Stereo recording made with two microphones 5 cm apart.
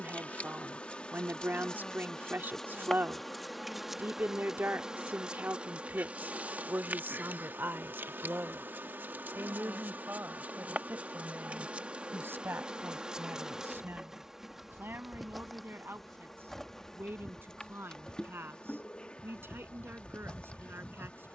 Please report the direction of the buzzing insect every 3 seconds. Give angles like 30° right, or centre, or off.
20° left, 10° right, 40° right, 30° right, 10° right, 10° left, 20° left.